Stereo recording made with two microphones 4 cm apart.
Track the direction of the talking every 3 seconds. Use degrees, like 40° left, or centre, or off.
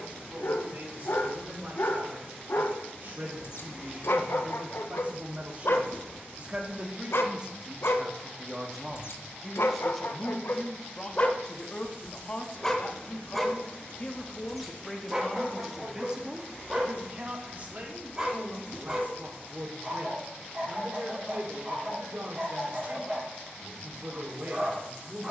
50° right, 40° right, 20° right, 10° left, 30° left, 20° right, 50° right, 50° right, 50° right.